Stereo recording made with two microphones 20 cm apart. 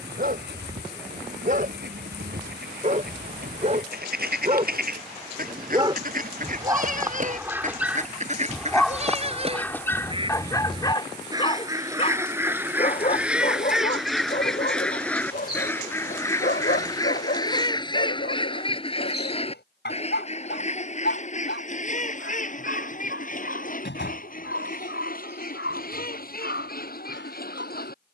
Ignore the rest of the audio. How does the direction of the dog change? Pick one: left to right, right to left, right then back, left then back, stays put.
right to left.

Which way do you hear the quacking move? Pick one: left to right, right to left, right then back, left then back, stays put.
right to left.